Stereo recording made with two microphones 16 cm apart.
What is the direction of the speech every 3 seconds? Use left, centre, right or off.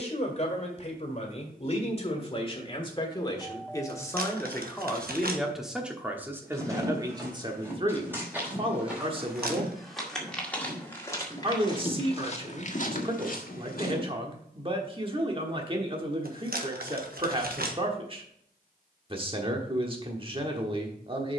left, centre, right, right, right, right, right.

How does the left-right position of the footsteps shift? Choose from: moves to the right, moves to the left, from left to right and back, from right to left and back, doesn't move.
moves to the left.